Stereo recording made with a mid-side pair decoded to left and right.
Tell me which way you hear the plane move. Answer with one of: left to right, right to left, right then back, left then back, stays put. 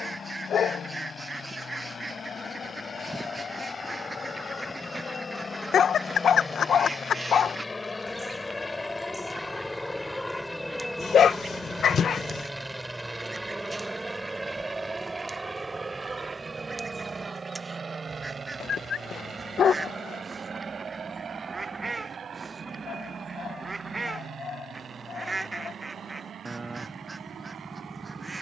left to right.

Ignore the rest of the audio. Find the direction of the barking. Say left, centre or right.
left.